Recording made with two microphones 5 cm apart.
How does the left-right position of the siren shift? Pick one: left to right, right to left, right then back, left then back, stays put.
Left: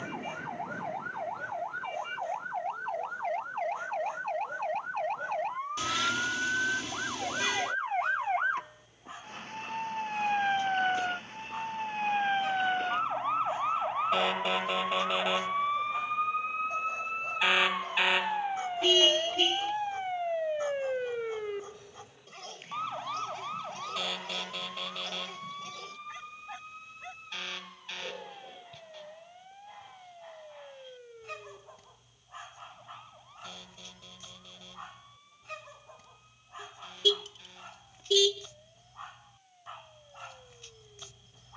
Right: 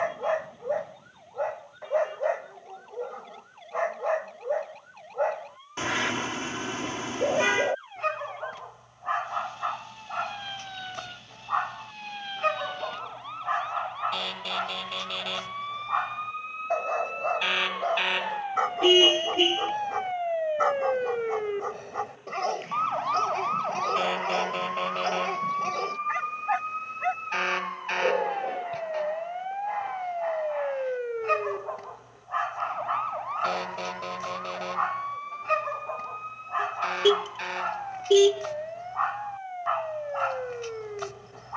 left to right.